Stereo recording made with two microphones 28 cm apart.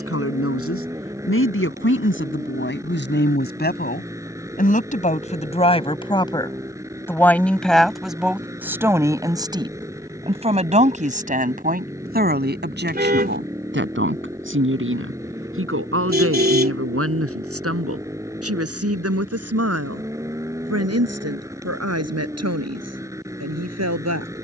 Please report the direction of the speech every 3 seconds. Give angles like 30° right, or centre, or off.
50° left, 30° left, centre, 20° right, 40° right, 50° right, 60° right, 70° right.